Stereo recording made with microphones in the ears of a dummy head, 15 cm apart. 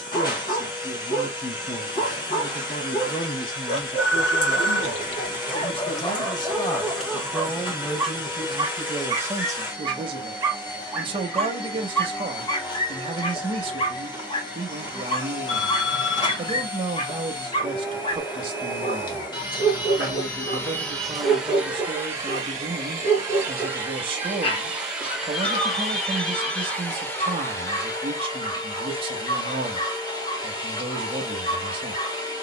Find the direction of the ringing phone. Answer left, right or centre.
left.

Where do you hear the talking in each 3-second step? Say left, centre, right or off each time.
left, left, centre, right, right, right, right, right, right, right, right.